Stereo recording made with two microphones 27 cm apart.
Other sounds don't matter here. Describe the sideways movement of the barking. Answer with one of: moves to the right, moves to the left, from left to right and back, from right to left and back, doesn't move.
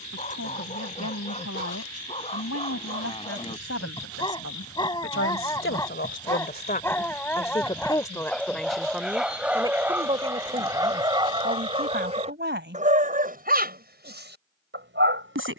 moves to the right.